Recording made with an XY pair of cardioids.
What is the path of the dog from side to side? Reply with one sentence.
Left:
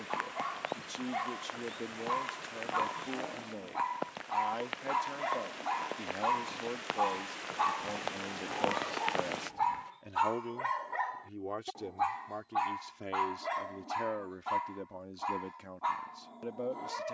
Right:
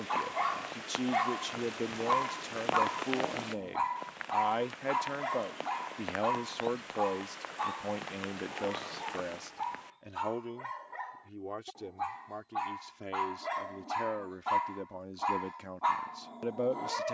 In this clip you hear the dog go left and come back.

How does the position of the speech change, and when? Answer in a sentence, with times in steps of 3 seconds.
You can hear the speech on the right from 0 s, in the centre from 9 s and on the right from 15 s.